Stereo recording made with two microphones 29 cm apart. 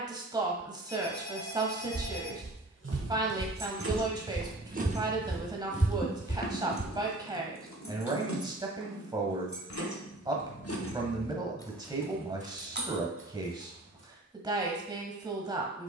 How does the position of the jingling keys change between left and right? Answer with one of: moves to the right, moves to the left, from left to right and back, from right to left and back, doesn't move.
from right to left and back.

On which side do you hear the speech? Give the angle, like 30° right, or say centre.
10° right.